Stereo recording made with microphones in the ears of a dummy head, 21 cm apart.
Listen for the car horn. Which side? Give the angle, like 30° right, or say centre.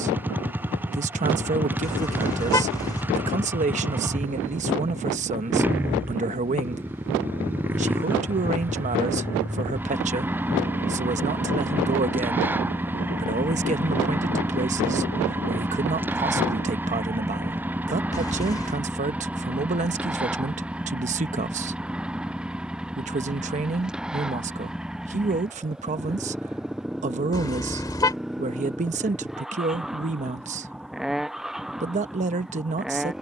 20° left.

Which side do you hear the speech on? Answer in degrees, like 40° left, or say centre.
30° right.